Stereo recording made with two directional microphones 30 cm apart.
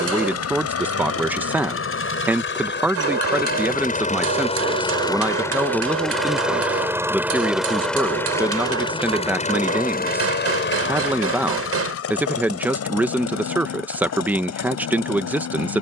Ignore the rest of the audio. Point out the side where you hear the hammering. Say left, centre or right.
right.